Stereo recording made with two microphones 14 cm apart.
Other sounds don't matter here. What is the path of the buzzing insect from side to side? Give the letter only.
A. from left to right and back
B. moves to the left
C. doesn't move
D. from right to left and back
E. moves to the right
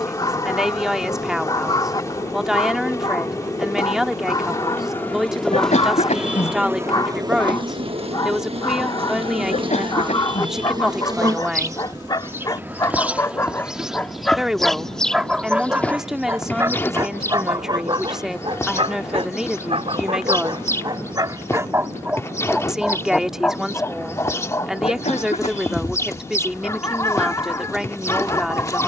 A.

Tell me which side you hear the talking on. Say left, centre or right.
centre.